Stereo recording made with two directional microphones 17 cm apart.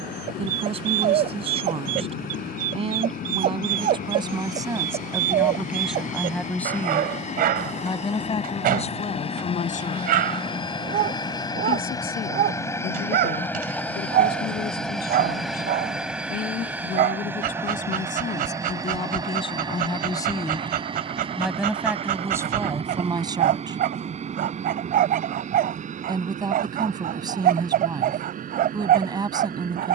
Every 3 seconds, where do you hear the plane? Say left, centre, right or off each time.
left, left, left, left, centre, centre, right, right, right, right.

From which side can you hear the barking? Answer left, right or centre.
right.